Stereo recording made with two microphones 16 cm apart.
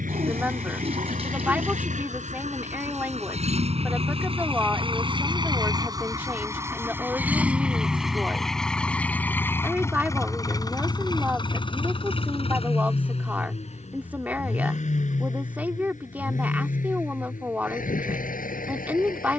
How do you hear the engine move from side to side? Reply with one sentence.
In this clip you hear the engine go from the right side to the left.